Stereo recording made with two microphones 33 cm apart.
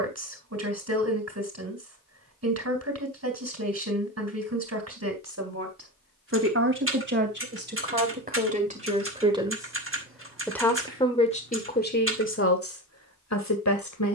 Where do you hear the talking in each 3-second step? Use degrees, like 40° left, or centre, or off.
50° right, 50° right, 30° right, 10° left, 50° left.